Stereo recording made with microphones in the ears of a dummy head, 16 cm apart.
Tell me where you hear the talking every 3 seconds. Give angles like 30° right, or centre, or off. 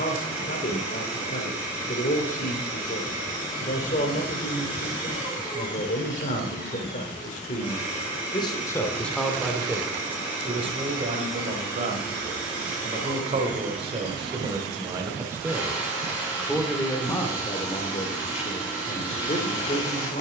40° left, 40° left, 40° left, 30° right, 30° right, 10° left, 40° left.